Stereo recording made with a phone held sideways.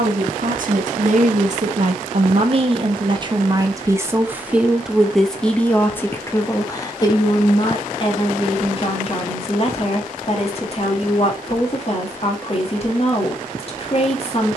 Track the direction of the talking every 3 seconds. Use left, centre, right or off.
right, centre, left, left, left.